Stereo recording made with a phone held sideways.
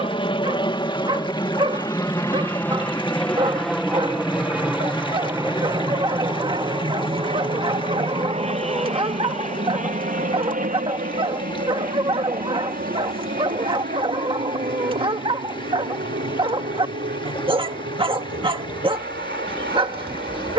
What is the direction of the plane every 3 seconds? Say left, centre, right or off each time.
left, centre, right, right, right, right, right.